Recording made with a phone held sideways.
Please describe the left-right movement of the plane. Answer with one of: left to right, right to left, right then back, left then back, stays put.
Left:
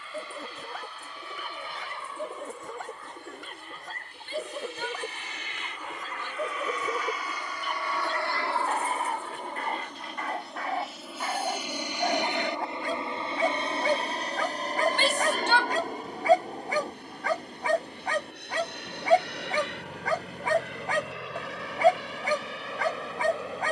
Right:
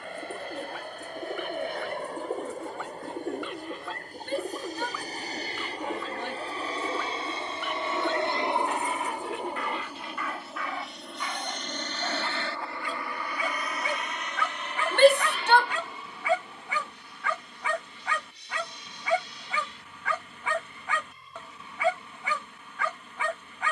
right to left.